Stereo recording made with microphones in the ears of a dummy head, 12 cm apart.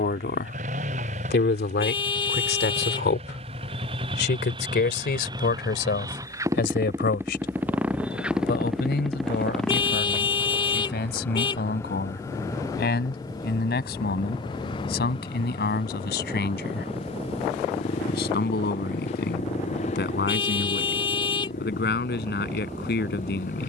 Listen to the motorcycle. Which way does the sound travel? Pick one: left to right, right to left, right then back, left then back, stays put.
right to left.